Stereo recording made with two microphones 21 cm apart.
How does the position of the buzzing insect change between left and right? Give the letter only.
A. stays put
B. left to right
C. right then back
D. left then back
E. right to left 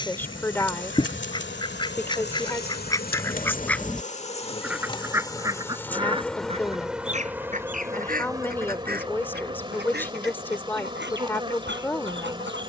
B.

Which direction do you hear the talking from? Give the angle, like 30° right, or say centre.
10° left.